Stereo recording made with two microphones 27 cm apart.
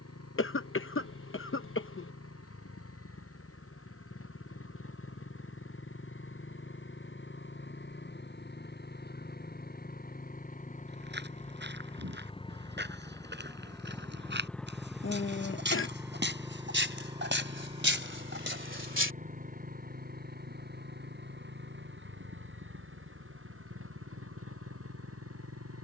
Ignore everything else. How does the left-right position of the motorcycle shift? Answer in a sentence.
You can hear the motorcycle travel towards the right.